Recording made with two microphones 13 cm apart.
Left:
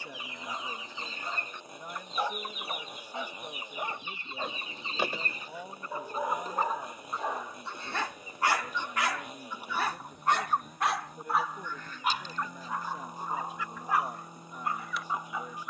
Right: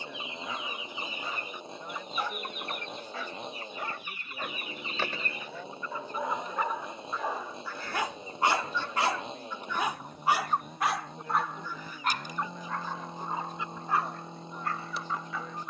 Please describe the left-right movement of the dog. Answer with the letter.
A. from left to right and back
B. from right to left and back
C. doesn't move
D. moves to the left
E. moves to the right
A.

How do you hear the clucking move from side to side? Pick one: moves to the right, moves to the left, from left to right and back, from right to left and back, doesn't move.
from right to left and back.